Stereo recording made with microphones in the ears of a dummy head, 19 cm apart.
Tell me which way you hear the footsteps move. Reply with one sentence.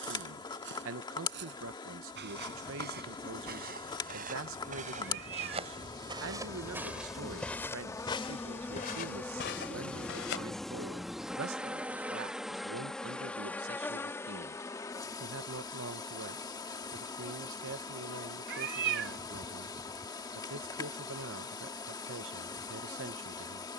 You can hear the footsteps move from right to left.